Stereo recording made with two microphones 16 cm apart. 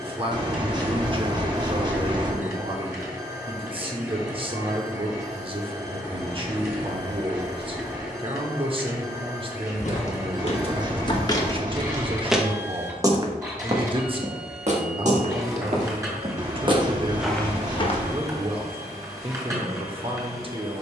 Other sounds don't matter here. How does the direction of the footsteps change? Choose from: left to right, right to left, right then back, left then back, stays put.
right then back.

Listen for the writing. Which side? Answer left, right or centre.
right.